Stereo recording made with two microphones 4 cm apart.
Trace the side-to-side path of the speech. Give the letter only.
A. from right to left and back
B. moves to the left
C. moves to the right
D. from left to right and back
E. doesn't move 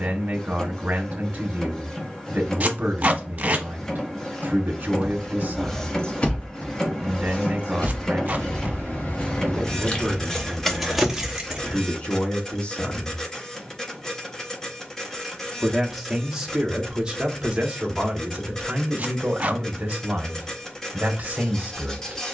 A.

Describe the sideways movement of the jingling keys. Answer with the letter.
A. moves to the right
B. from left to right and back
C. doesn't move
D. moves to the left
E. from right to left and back
E.